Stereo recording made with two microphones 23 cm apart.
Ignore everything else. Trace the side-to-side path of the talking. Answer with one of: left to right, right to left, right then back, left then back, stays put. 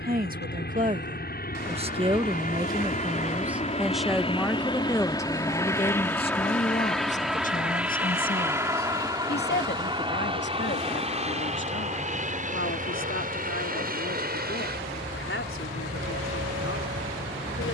right to left.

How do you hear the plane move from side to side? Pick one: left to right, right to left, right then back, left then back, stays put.
left to right.